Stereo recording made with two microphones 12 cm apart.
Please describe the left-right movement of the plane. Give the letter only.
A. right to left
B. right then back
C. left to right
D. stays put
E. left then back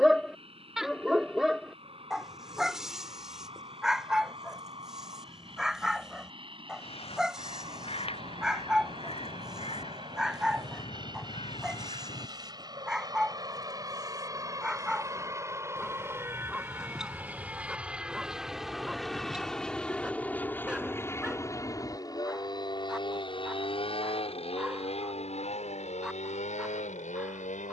A.